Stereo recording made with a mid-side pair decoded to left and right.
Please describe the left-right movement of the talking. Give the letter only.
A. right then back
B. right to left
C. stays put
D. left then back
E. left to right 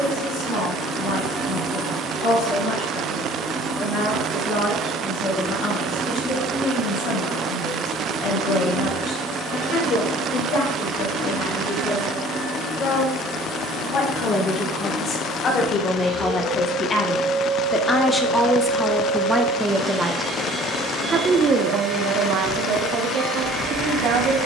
E.